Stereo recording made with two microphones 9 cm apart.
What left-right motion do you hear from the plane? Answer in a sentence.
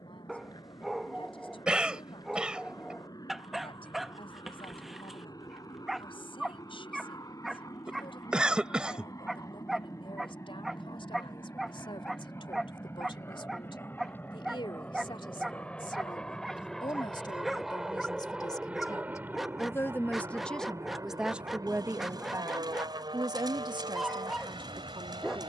In this clip you hear the plane move from left to right.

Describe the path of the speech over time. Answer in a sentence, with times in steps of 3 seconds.
In this clip you hear the speech on the left from 0 s and on the right from 21 s.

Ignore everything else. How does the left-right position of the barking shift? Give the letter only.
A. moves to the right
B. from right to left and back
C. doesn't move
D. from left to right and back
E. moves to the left
C.